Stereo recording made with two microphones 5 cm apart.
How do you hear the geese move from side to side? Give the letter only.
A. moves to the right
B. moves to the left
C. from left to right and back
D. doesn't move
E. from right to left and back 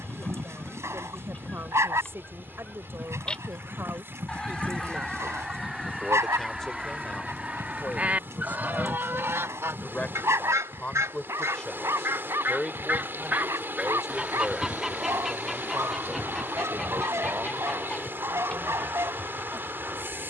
C.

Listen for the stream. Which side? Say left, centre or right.
right.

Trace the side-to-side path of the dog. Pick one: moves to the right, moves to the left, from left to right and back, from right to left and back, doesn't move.
doesn't move.